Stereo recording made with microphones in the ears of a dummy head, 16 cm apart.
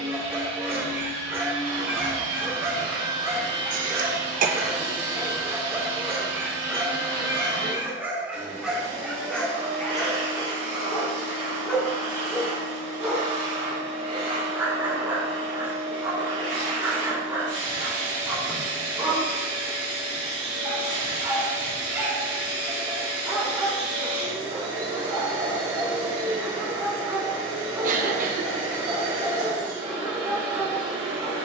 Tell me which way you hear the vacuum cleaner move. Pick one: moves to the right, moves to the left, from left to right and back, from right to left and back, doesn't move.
doesn't move.